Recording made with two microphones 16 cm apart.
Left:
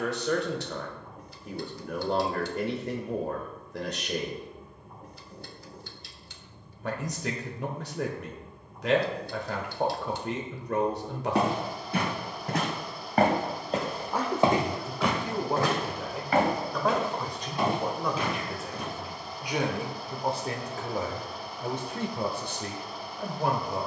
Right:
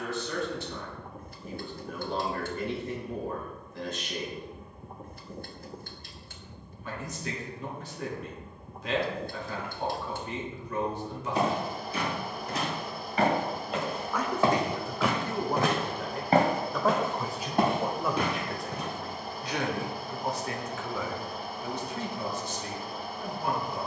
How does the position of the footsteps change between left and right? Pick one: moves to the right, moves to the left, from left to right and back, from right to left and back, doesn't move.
moves to the right.